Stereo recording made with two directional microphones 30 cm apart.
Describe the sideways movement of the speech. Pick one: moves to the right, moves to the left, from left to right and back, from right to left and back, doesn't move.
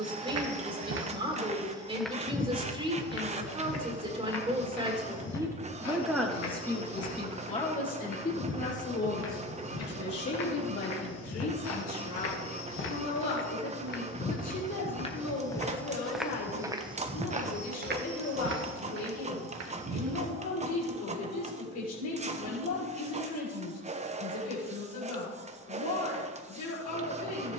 moves to the left.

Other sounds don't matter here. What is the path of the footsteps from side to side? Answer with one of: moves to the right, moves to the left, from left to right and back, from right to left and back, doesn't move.
from right to left and back.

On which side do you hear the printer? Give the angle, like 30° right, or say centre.
20° right.